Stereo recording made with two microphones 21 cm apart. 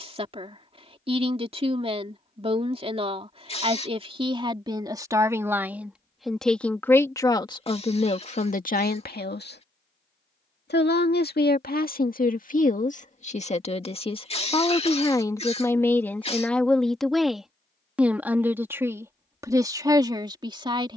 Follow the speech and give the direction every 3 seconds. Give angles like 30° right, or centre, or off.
30° right, 20° right, 20° left, 50° left, 30° left, 10° left, 20° right.